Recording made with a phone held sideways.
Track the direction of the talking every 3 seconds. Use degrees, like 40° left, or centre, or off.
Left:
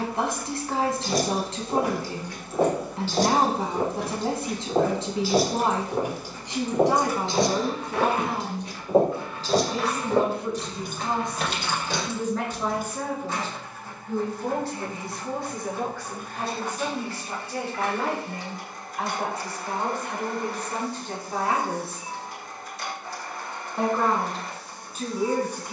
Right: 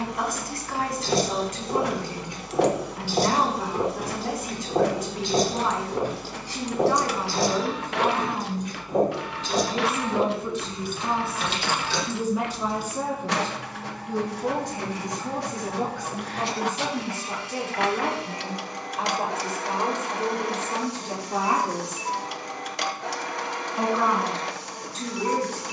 30° left, 30° left, 10° left, centre, 10° right, 20° right, 20° right, 20° right, 10° left.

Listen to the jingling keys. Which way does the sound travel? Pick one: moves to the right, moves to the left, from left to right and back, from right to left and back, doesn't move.
moves to the left.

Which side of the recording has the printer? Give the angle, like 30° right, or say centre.
80° right.